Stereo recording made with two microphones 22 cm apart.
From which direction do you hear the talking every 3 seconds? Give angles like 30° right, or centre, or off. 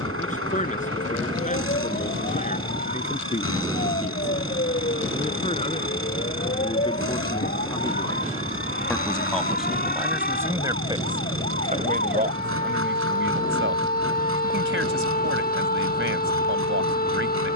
30° left, 30° left, 20° left, 10° right, 50° right, 60° right.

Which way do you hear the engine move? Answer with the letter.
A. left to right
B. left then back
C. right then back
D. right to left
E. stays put
E.